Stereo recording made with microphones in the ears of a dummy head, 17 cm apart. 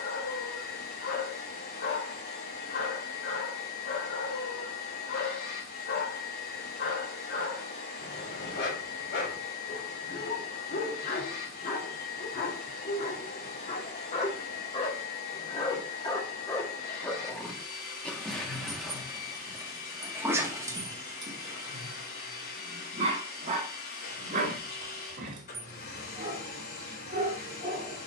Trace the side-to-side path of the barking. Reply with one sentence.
In this clip you hear the barking go from the left side to the right.